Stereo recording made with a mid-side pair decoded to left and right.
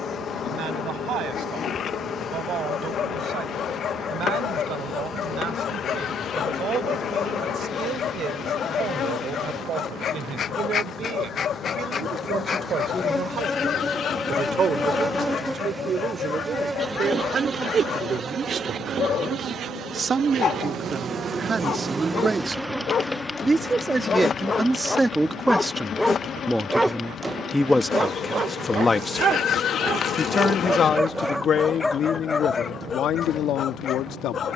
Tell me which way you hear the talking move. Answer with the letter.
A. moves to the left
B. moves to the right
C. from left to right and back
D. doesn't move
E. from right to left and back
A.